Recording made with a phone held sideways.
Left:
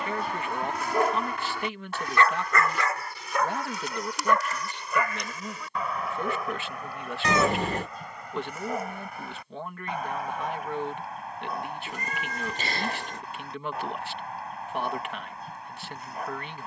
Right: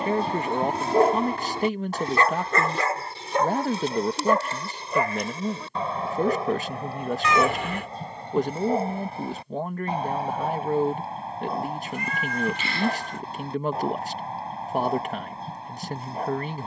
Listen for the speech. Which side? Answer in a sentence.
You can hear the speech on the right.